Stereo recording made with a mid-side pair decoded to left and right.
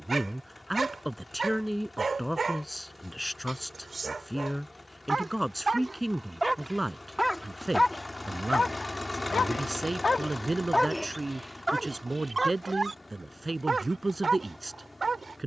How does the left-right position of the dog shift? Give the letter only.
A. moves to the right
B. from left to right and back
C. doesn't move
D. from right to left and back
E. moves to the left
D.